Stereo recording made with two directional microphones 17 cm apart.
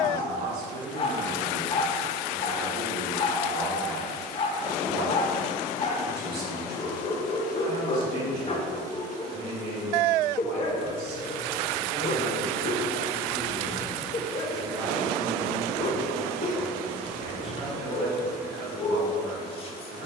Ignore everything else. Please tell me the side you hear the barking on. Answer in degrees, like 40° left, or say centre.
40° left.